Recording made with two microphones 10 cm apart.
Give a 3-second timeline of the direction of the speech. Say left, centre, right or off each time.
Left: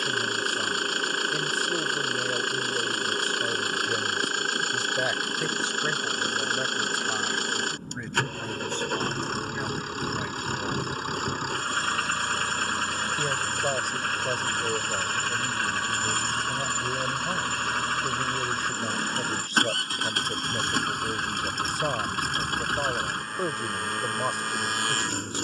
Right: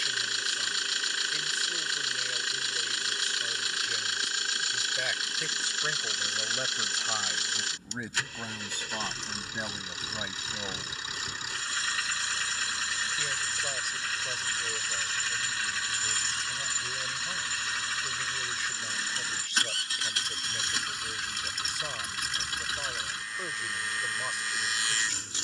left, left, centre, centre, left, left, left, left, left.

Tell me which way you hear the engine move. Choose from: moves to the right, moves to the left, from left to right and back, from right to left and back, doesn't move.
doesn't move.